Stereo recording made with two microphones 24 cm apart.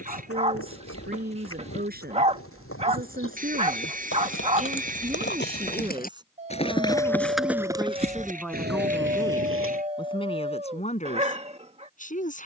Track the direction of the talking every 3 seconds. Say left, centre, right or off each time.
right, right, centre, left.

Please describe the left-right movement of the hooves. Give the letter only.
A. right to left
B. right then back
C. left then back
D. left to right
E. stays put
D.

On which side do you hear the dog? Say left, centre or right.
right.